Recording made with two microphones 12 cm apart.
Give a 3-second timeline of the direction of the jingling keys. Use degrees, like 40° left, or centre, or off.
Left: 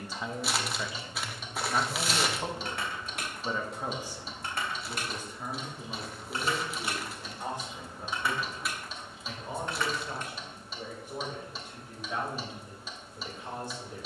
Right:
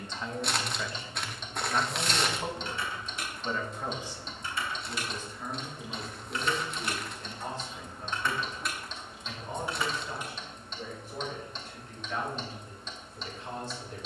70° left, 50° left, 20° left, 10° right, off.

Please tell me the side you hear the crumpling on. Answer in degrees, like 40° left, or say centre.
centre.